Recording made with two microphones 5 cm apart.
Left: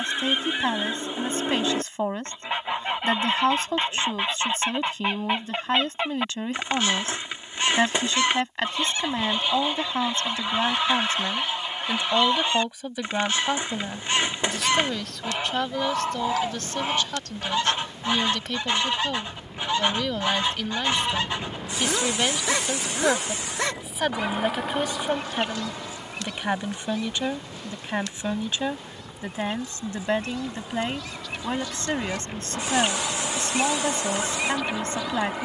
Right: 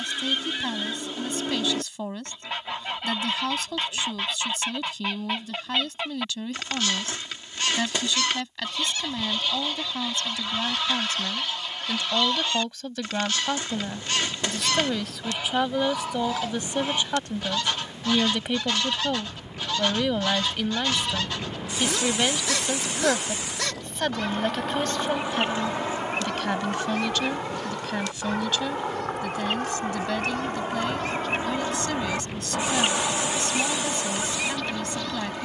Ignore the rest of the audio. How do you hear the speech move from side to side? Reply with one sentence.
You can hear the speech move from left to right and back again.